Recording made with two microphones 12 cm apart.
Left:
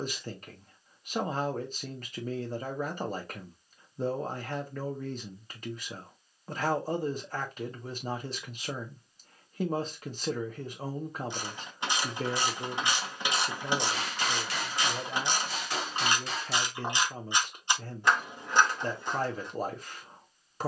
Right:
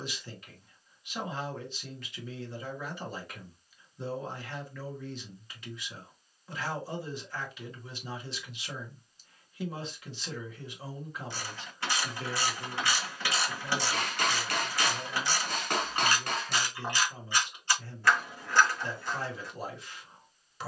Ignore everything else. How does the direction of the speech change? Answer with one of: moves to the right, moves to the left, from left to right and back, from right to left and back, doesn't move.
doesn't move.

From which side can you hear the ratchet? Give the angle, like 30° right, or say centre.
20° left.